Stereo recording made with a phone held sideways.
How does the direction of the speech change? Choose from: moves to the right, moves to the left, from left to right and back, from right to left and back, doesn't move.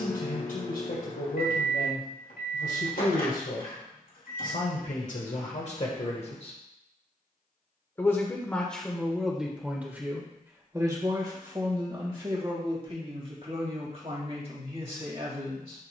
moves to the right.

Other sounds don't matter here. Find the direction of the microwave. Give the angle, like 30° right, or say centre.
70° left.